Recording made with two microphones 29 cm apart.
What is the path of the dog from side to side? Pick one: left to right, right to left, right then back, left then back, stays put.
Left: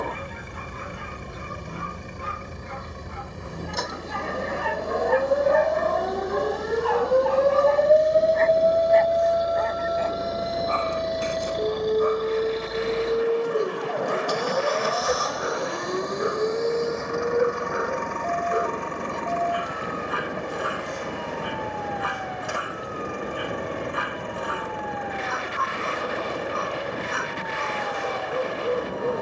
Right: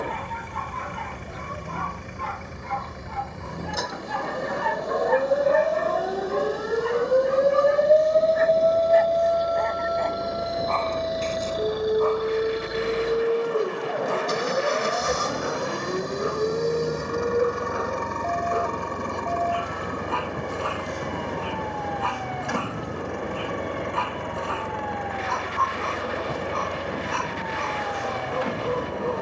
right to left.